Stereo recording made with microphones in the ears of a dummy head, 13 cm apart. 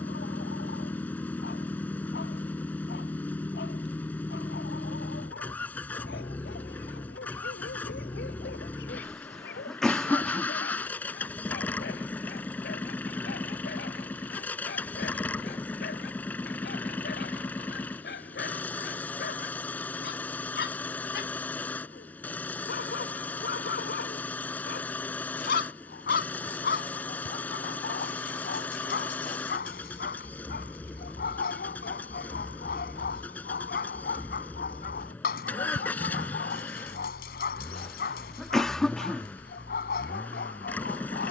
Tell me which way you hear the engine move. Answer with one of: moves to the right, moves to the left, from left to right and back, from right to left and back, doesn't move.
doesn't move.